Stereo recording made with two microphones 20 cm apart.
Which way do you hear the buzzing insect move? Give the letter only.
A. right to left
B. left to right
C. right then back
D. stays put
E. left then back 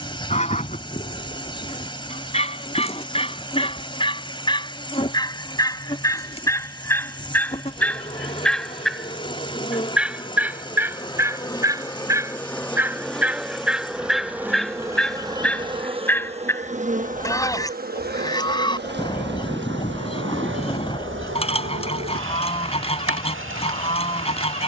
B.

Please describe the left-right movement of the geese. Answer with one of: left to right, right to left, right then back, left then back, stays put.
right then back.